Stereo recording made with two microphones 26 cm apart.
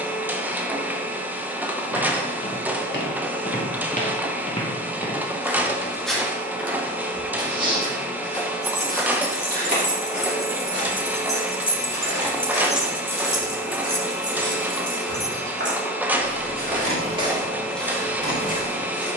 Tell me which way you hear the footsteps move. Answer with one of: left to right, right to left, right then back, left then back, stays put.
right then back.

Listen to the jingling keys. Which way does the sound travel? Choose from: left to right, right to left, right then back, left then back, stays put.
left to right.